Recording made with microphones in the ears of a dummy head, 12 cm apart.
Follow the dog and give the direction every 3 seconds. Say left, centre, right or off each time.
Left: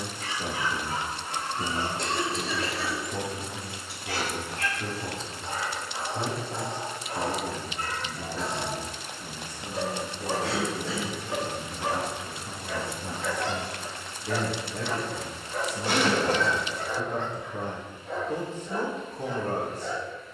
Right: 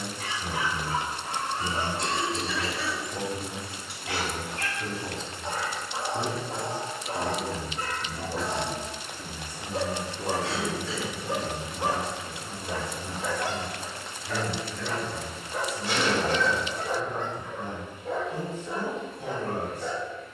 right, right, right, right, centre, right, right.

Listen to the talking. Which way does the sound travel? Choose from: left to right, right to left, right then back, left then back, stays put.
right then back.